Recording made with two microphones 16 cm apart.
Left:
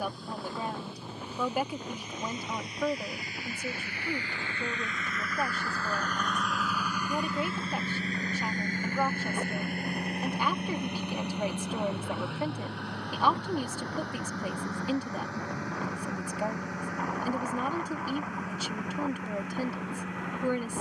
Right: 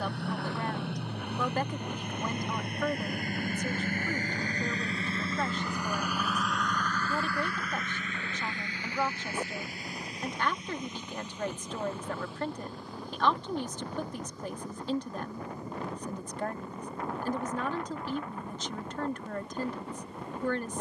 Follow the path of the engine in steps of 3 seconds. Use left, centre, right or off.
right, right, left, left, left, left, left.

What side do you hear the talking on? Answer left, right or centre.
centre.